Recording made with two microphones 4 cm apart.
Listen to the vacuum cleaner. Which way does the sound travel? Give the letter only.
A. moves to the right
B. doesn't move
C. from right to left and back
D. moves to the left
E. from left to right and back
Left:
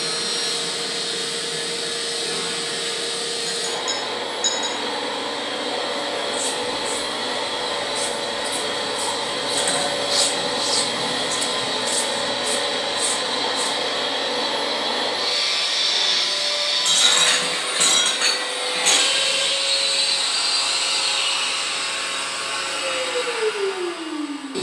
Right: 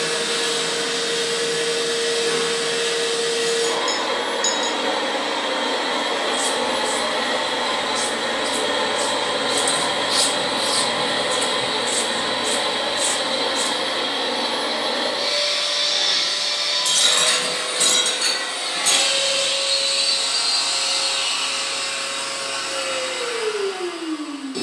D.